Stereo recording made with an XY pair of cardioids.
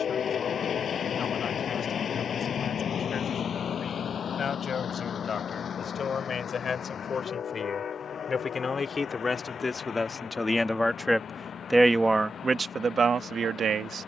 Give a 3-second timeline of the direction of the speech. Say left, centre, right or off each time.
left, left, left, left, right.